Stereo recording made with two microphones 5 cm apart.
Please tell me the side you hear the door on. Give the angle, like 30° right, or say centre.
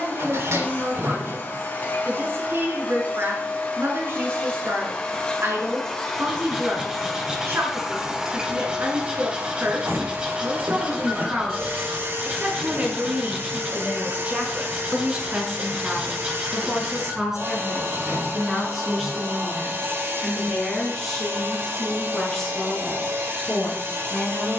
70° right.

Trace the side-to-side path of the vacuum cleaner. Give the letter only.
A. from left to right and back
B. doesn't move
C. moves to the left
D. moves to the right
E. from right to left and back
D.